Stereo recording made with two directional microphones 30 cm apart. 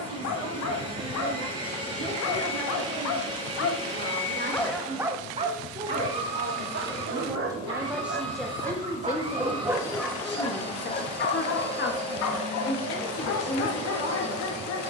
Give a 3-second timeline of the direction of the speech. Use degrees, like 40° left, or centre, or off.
50° right, 40° right, 10° right, 30° left, 30° left.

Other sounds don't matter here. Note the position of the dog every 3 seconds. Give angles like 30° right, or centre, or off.
60° left, 10° left, 40° right, 10° left, 60° left.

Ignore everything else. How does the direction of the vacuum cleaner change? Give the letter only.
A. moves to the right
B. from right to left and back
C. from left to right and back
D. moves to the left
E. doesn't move
E.